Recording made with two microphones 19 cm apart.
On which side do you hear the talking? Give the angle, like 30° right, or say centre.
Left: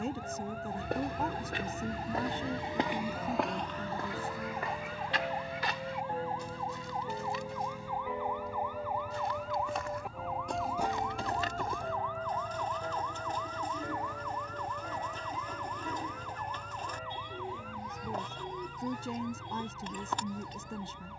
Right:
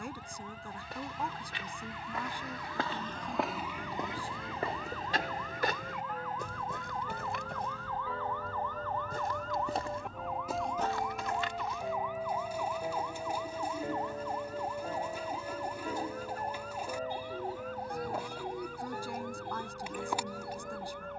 20° left.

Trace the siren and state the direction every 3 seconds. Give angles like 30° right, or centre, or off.
50° left, 40° left, 20° left, centre, 20° right, 40° right, 50° right.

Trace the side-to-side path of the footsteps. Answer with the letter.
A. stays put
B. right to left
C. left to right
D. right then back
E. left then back
D.